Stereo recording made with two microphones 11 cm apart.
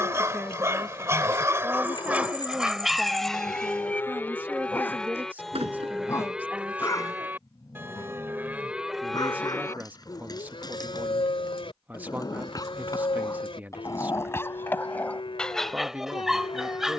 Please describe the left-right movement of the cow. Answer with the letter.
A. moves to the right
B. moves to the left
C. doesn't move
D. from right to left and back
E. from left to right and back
E.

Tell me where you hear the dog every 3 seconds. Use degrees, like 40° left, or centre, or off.
20° right, 10° left, 30° left, 40° left, 30° left, centre.